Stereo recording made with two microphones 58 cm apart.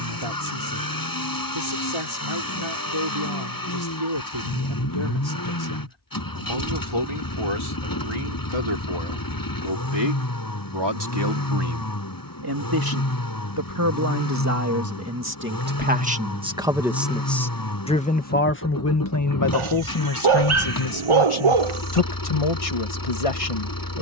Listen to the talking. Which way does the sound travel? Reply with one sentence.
In this clip you hear the talking move from right to left.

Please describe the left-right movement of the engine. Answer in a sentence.
You can hear the engine stay put.